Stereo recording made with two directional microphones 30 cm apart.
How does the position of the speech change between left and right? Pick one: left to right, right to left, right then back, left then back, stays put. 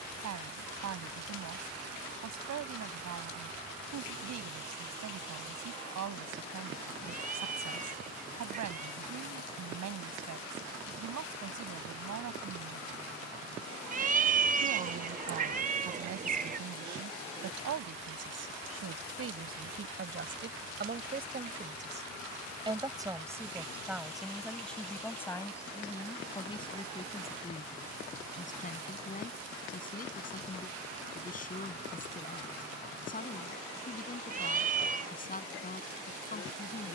right to left.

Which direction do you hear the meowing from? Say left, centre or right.
right.